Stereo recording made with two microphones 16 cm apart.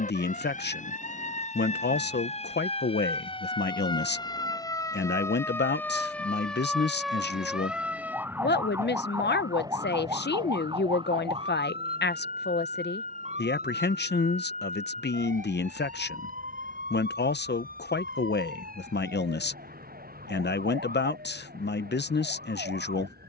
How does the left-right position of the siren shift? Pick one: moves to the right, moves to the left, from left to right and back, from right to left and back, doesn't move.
moves to the right.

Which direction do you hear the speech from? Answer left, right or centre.
left.